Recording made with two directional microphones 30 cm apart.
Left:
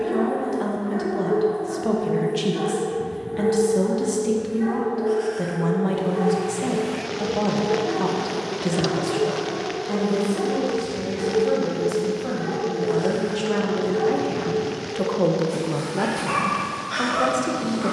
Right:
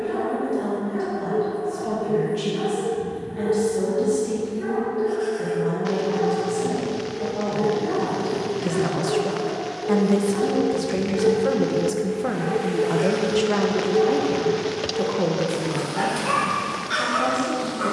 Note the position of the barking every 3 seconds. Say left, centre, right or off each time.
left, left, centre, right, right, right.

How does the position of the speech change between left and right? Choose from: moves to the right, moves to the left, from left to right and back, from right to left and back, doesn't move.
from left to right and back.